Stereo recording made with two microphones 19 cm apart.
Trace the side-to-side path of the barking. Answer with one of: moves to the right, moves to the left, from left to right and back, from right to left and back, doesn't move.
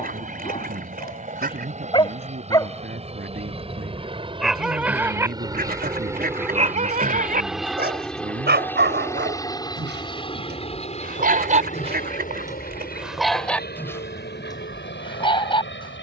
from left to right and back.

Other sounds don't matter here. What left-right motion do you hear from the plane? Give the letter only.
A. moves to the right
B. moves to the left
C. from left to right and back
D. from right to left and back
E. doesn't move
B.